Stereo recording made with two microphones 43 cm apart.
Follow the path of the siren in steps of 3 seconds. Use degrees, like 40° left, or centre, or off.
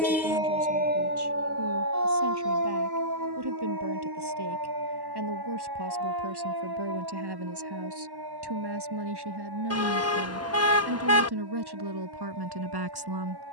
30° right, 50° right, 60° right, 70° right, 70° right.